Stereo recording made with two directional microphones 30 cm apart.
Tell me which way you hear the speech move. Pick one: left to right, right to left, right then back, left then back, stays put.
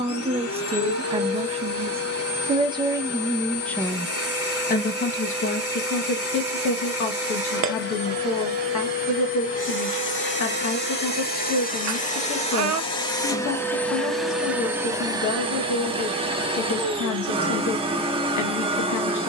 right to left.